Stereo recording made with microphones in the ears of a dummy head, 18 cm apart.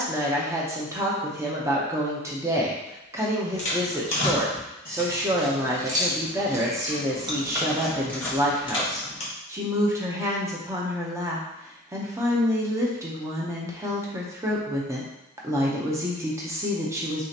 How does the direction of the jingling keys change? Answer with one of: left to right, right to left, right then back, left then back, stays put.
right then back.